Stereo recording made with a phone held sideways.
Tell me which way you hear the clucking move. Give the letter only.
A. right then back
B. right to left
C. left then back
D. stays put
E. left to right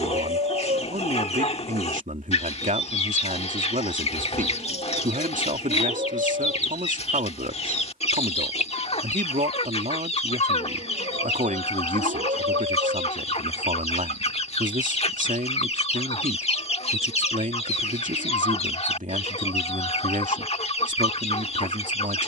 D.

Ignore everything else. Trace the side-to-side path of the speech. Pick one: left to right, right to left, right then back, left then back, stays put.
stays put.